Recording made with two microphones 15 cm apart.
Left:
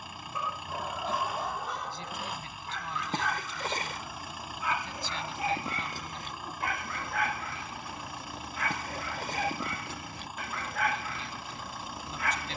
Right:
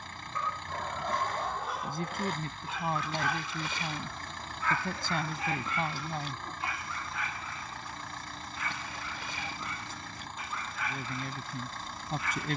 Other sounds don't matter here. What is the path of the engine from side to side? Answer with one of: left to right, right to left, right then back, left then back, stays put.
stays put.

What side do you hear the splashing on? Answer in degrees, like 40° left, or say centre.
50° left.